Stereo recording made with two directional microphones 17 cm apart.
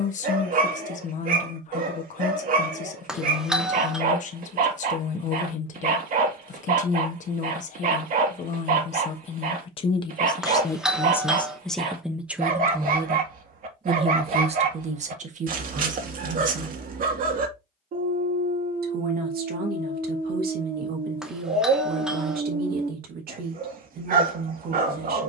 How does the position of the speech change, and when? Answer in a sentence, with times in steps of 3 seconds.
You can hear the speech on the left from 0 s and on the right from 12 s.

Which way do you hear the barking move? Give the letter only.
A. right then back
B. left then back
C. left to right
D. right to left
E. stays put
E.